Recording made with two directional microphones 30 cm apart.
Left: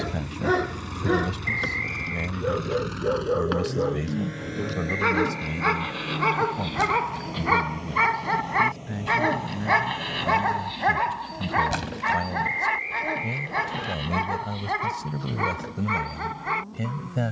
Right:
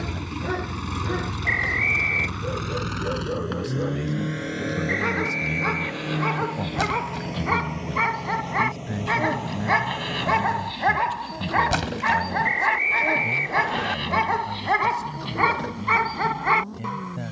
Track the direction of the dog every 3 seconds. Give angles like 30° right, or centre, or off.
40° left, 30° left, 20° left, 10° right, 30° right, 50° right.